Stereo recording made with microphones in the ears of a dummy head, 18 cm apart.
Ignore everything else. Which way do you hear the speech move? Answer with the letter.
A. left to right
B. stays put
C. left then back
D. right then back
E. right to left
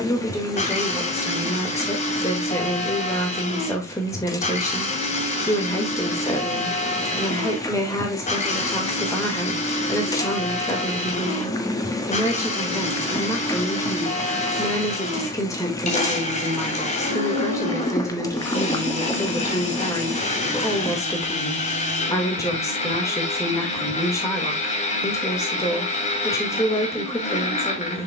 B.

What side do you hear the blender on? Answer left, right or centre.
left.